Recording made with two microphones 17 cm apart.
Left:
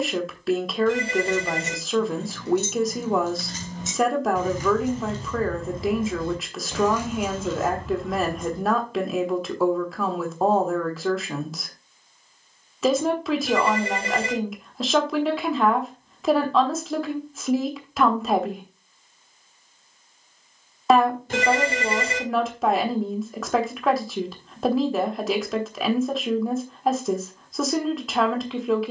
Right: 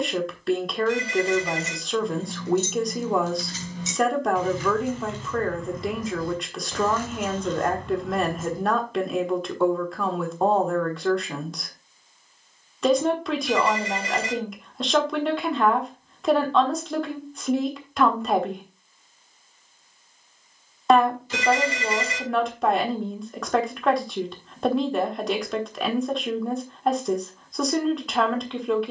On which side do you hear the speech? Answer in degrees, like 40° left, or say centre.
centre.